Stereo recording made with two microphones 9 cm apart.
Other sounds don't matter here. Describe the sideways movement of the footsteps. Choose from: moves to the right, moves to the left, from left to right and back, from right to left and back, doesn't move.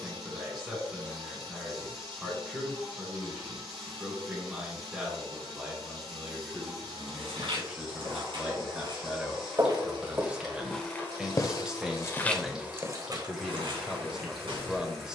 from right to left and back.